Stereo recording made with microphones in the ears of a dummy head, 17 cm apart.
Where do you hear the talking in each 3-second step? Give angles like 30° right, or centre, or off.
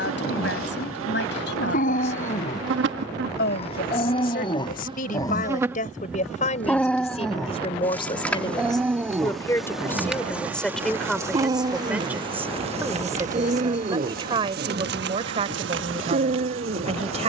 60° left, 50° left, 30° left, 10° left, 20° right, 30° right.